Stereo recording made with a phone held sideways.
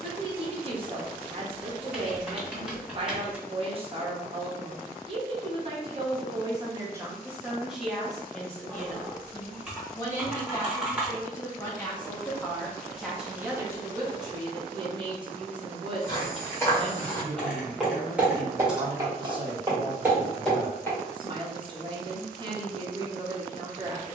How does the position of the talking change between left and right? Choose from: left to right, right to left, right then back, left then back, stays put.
left then back.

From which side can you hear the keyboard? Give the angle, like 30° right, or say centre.
10° right.